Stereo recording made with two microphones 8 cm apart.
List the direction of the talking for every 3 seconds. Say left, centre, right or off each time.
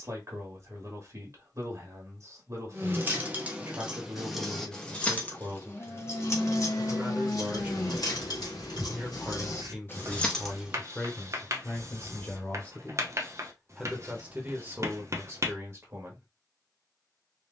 right, right, right, centre, centre, right.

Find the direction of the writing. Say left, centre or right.
right.